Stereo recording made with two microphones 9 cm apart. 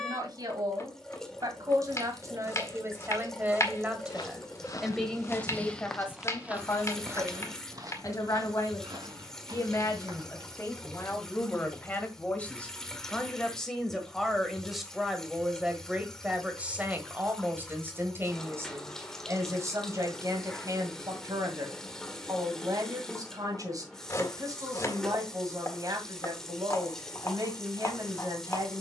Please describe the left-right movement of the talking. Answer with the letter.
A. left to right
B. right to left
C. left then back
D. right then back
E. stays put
C.